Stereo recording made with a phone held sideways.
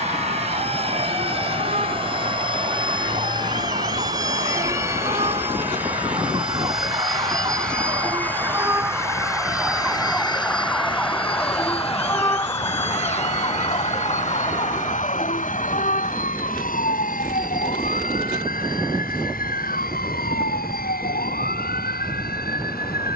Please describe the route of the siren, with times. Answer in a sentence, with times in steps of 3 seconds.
You can hear the siren on the right from 0 s, in the centre from 9 s and on the left from 12 s.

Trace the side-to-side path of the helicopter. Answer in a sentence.
You can hear the helicopter travel towards the left.